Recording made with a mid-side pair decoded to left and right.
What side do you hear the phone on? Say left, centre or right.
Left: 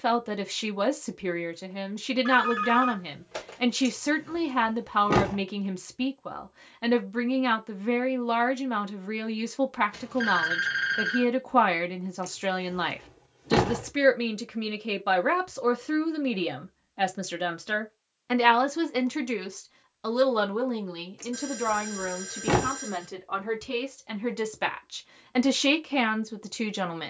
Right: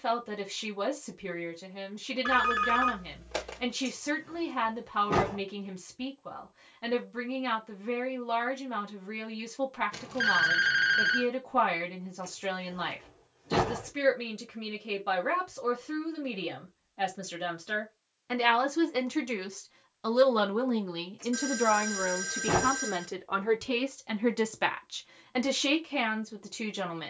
right.